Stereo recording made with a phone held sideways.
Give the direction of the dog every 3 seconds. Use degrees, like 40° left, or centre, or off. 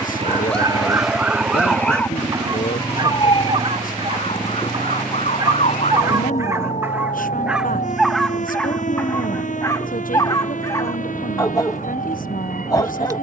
10° right, 40° right, 10° right, 20° left, 20° left.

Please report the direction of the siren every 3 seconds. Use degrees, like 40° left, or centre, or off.
10° right, 40° left, 50° left, 60° left, 60° left.